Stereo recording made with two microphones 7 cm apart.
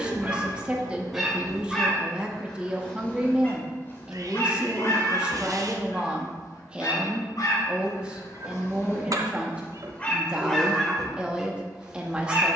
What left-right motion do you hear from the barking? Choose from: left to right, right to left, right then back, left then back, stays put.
left then back.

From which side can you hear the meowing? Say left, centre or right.
right.